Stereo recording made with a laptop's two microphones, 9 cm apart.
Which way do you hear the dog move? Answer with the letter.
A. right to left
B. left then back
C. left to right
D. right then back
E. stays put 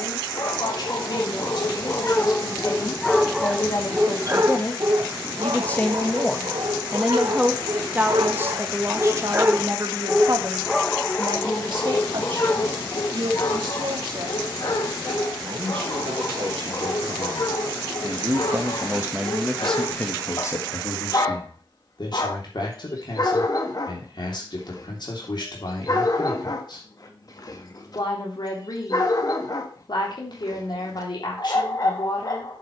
D.